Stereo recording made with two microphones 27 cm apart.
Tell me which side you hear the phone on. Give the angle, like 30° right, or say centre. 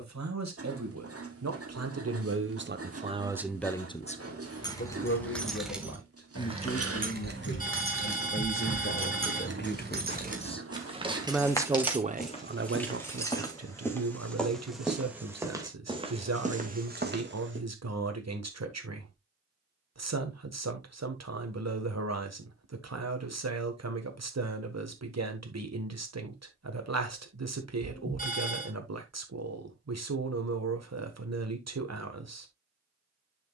30° left.